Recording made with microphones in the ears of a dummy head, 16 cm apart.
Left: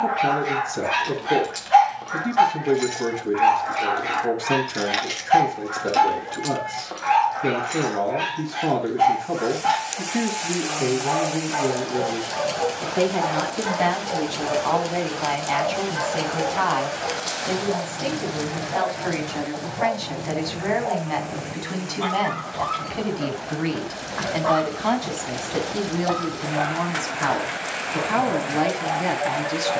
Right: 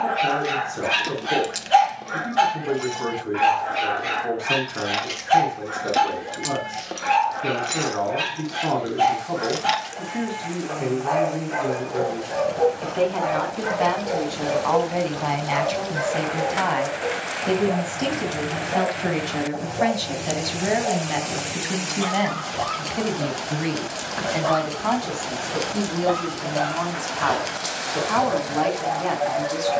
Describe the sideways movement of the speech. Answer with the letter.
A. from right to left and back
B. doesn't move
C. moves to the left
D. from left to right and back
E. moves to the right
D.